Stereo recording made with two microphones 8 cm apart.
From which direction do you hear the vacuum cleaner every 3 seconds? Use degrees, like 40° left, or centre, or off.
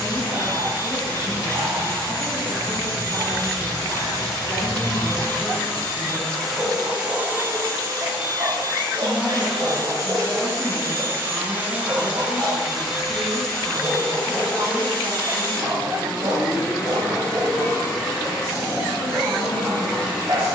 50° left, 40° left, 30° right, 30° right, centre, 30° left, 40° left.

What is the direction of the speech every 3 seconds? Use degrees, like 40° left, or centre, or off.
40° left, 40° left, 30° left, 20° right, 70° right, 70° right, 70° right.